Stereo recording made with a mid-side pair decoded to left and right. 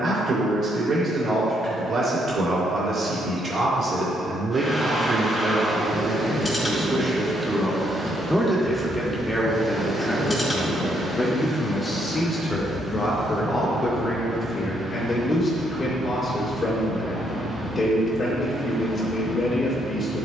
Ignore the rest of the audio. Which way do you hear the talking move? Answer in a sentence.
In this clip you hear the talking move to the left.